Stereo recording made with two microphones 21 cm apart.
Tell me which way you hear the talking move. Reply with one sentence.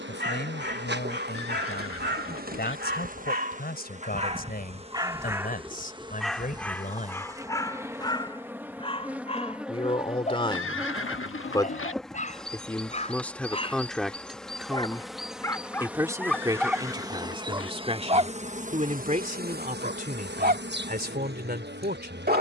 You can hear the talking travel towards the right.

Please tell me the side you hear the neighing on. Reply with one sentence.
You can hear the neighing on the left.